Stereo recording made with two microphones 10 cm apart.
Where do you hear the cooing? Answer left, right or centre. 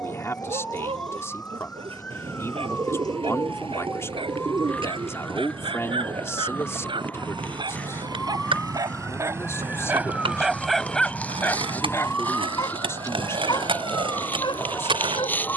right.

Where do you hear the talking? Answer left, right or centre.
left.